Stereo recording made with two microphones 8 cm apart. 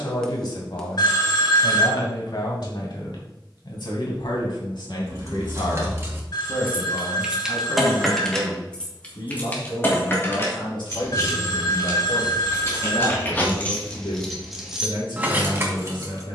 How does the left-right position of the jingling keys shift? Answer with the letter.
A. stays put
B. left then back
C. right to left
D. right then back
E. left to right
B.